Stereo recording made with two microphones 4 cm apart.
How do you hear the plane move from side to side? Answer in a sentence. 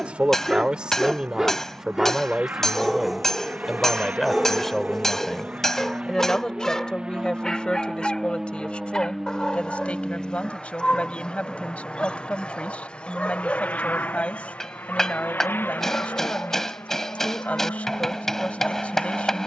You can hear the plane go from the right side to the left.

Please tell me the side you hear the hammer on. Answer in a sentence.
You can hear the hammer in the centre.